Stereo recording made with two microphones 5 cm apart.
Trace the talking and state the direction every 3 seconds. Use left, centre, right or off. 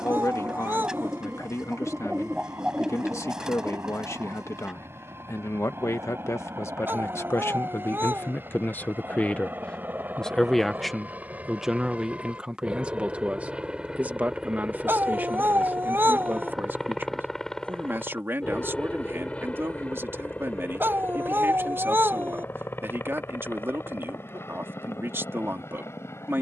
left, left, left, centre, right, right, right, right, right.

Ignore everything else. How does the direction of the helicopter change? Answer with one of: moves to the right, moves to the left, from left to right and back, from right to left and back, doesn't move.
moves to the left.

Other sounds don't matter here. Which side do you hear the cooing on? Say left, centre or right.
centre.